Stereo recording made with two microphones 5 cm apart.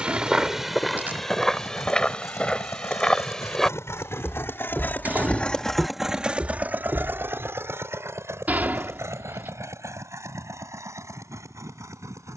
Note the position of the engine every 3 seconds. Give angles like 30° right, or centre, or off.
80° left, 40° left, 50° right, 70° right.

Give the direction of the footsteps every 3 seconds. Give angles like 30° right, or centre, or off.
10° left, centre, 40° right, off.